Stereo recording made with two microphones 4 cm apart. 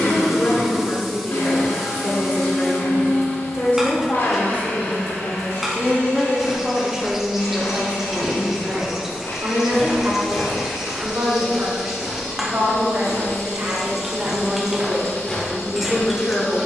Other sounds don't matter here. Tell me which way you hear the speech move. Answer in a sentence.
You can hear the speech move from left to right and back again.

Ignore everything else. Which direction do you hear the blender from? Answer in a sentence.
In this clip you hear the blender on the left.